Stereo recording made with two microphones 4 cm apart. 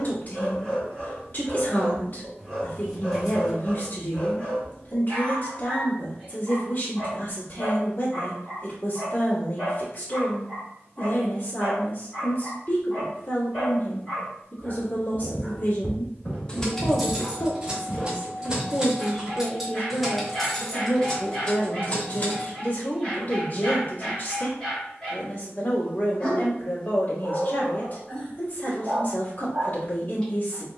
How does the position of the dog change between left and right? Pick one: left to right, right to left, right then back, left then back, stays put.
stays put.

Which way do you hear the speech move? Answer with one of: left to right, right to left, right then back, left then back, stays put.
stays put.